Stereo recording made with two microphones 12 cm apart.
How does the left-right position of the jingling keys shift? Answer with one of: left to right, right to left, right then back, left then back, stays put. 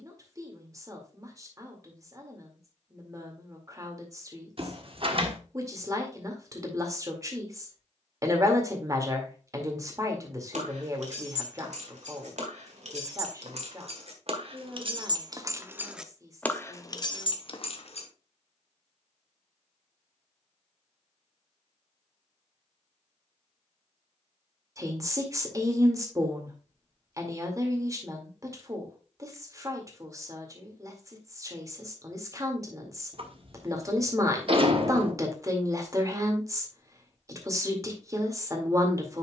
right to left.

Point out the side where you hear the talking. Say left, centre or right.
right.